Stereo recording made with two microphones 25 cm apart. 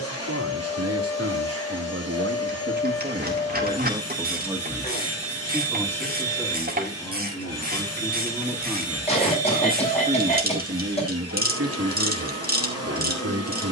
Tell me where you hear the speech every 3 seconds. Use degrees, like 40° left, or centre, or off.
70° right, 10° right, 10° left, 40° right, 80° right.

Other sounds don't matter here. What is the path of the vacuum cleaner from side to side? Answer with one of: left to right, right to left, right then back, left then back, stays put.
stays put.